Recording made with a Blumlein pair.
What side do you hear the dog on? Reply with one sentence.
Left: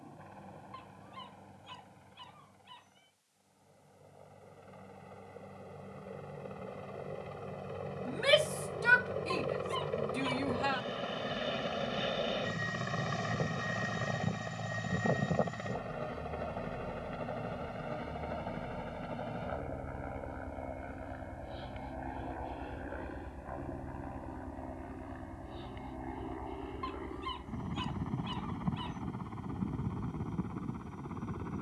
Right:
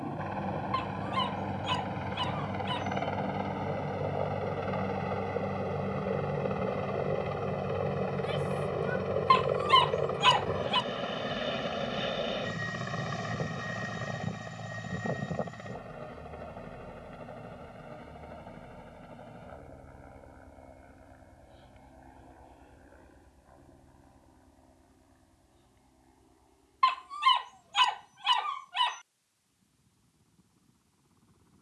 You can hear the dog on the right.